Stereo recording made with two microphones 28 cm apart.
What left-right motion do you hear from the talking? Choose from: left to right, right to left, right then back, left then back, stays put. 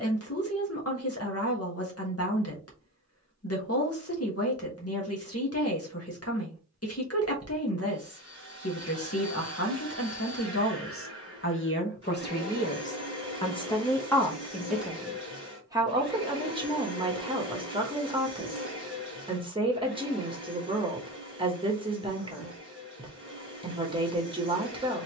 left to right.